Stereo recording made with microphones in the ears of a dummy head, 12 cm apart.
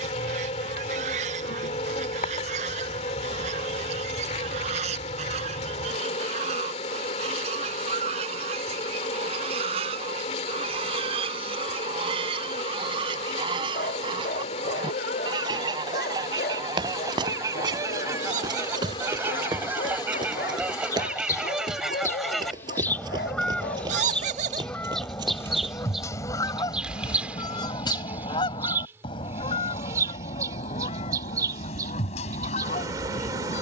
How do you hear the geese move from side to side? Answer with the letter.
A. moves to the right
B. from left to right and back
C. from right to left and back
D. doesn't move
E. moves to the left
E.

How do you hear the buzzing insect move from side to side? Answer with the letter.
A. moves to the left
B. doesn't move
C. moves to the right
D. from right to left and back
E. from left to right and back
C.